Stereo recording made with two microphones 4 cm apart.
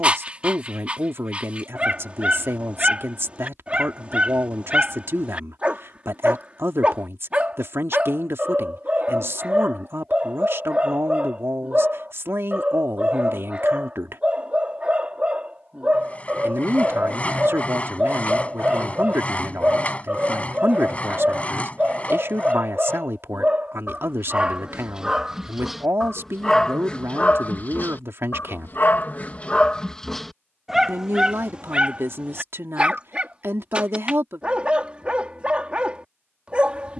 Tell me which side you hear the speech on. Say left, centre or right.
right.